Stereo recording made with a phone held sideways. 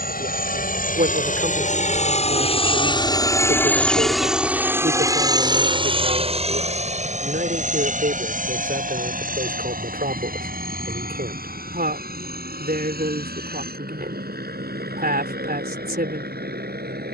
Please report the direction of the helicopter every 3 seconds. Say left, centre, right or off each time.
left, centre, right, right, right, right.